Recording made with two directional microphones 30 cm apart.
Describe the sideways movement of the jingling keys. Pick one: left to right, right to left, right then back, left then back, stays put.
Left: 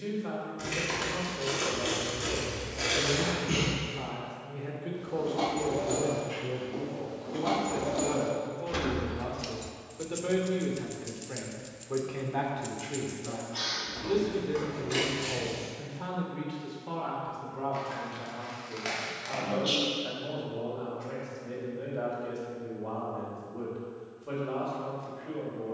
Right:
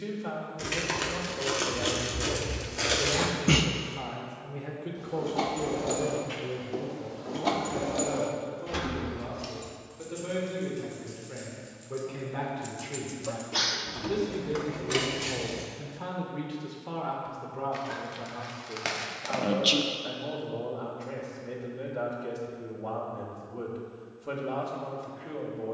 left then back.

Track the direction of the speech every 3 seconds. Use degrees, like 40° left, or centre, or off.
30° right, 10° right, 20° left, 30° left, 10° left, 10° right, 30° right, 30° right, 30° right.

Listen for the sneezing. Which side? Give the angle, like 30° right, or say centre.
70° right.